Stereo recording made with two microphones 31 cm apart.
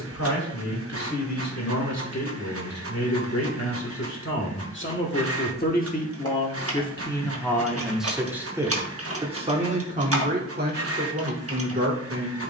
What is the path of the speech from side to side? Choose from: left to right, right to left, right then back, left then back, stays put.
left to right.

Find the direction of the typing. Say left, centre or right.
right.